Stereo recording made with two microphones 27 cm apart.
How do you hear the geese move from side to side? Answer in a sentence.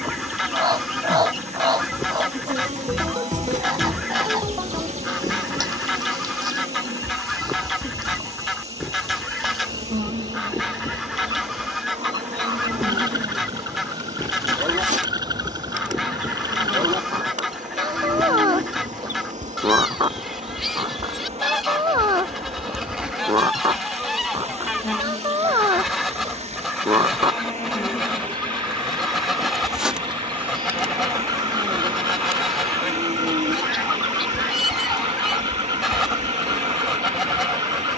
You can hear the geese stay in one place.